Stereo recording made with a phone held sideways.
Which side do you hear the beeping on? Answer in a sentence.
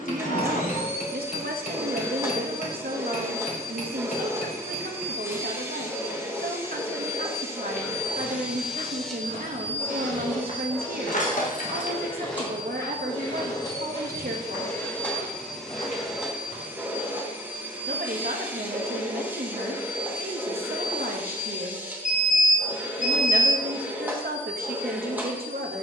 In this clip you hear the beeping on the left.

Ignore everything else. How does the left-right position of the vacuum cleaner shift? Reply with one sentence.
In this clip you hear the vacuum cleaner move from right to left and back again.